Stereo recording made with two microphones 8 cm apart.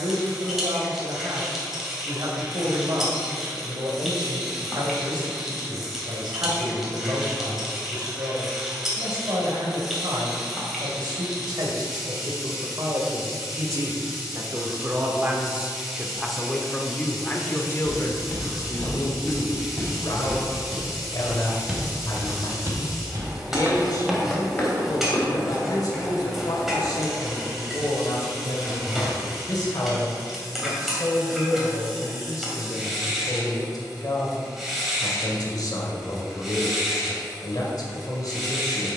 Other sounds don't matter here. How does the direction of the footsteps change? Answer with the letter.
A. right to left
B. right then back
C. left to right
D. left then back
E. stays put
B.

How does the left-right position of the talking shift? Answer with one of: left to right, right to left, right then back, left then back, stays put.
right to left.